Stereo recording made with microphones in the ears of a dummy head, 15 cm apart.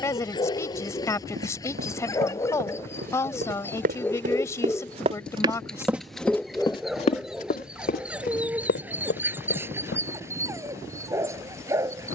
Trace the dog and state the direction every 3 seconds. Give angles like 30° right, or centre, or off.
20° left, 10° left, centre, 20° right.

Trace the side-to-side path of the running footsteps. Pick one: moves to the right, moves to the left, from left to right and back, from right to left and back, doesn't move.
moves to the left.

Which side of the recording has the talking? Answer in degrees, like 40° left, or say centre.
20° left.